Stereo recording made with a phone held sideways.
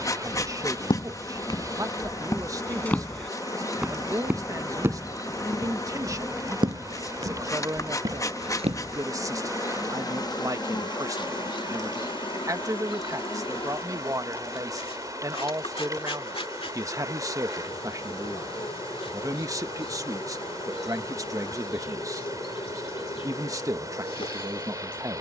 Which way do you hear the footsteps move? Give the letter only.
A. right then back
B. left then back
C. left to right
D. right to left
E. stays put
C.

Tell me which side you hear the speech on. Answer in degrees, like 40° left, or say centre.
20° right.